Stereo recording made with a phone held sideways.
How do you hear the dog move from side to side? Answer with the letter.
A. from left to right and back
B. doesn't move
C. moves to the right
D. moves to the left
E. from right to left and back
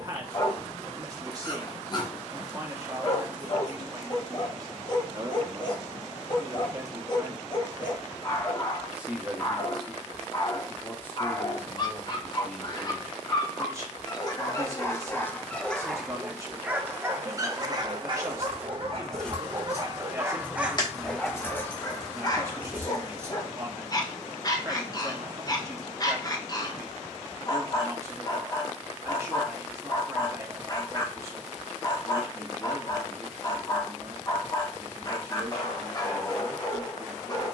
A.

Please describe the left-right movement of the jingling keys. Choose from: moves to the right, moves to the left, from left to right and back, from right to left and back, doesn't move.
from right to left and back.